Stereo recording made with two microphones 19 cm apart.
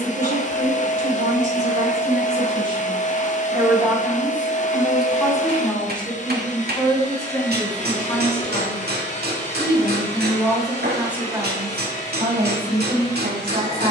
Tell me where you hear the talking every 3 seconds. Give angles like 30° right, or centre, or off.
40° right, centre, 20° left, centre, 50° right.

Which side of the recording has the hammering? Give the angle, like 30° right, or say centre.
60° right.